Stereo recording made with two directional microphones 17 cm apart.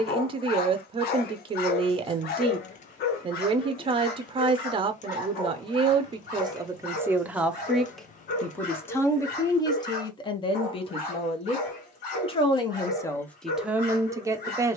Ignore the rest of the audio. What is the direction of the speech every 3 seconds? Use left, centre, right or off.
right, right, centre, left, centre.